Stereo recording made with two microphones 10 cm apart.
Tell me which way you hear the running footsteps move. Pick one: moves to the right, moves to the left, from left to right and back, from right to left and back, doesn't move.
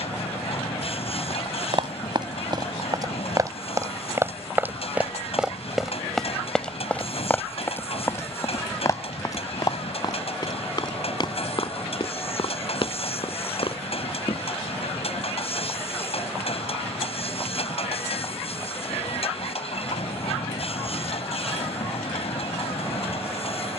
moves to the left.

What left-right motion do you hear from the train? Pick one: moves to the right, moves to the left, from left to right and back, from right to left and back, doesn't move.
doesn't move.